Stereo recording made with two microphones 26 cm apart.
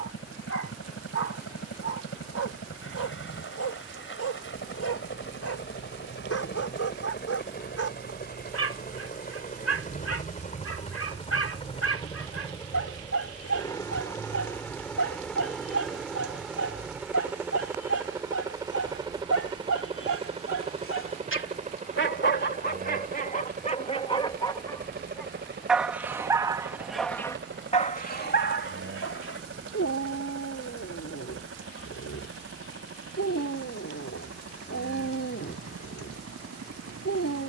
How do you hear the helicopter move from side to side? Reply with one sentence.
In this clip you hear the helicopter move to the right.